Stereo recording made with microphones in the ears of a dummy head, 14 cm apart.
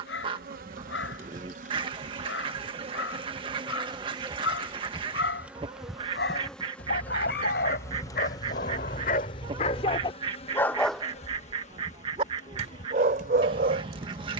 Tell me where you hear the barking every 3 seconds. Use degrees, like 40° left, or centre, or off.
80° left, 80° left, 60° left, 30° left, 50° right.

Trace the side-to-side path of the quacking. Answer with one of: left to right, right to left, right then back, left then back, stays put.
stays put.